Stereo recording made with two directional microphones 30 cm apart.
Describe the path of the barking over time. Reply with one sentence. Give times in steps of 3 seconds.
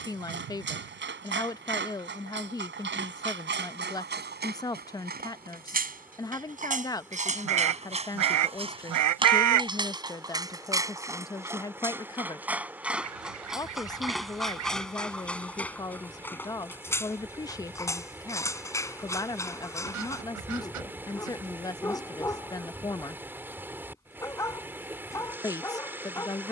You can hear the barking on the right from 0 s and in the centre from 9 s.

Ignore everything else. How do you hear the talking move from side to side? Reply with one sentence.
You can hear the talking stay in one place.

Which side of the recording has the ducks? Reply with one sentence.
You can hear the ducks on the right.